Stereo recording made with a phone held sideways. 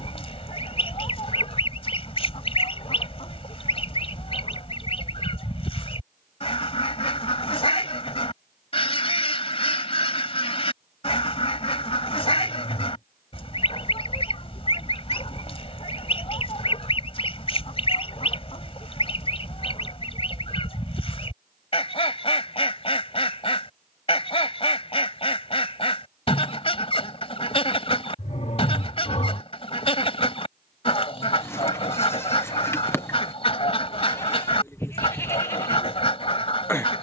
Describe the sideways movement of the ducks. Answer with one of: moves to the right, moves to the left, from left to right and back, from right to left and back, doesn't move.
doesn't move.